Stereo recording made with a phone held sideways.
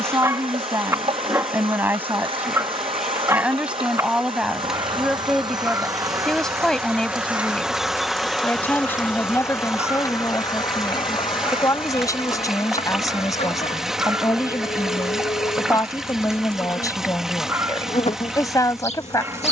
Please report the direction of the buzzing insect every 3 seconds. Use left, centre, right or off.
right, right, centre, left, left, left, left.